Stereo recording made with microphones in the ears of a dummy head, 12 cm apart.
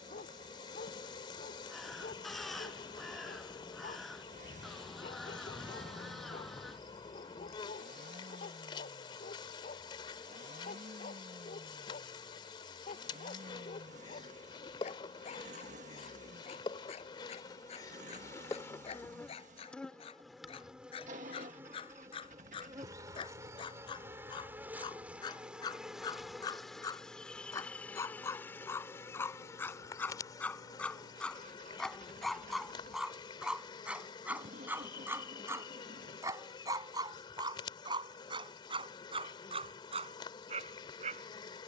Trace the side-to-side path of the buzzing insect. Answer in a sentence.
In this clip you hear the buzzing insect go right and come back.